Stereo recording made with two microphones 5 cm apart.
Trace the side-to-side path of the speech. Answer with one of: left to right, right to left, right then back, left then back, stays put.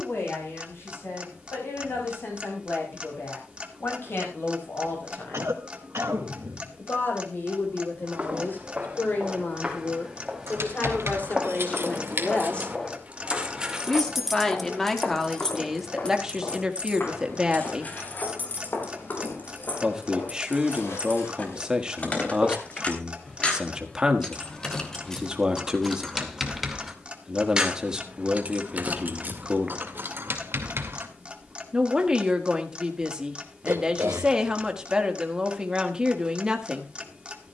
left to right.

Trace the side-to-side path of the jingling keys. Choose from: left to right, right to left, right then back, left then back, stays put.
left then back.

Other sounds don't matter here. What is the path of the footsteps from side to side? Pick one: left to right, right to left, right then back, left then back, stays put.
right to left.